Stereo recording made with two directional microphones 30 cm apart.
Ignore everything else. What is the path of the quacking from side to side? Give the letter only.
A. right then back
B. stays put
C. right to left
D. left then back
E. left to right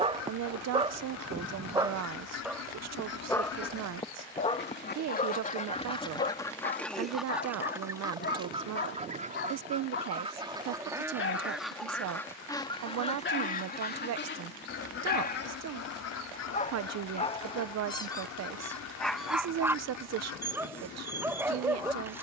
A.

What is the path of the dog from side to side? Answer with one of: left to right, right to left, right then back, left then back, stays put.
left then back.